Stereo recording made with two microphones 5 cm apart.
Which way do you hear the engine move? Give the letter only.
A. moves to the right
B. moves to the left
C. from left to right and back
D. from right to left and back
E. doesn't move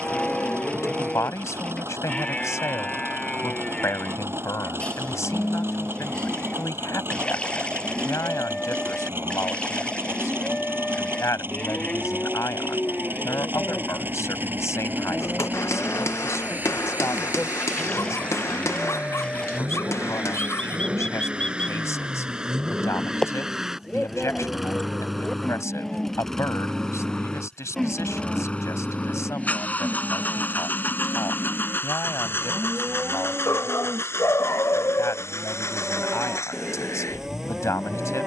B.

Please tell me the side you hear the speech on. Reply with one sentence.
In this clip you hear the speech on the left.